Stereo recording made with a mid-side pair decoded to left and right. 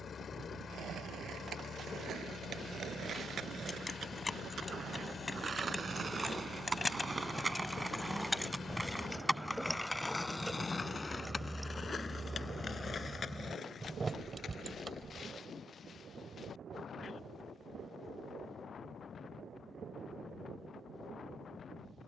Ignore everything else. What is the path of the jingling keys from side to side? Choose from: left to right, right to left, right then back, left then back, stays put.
left to right.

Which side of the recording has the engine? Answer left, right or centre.
left.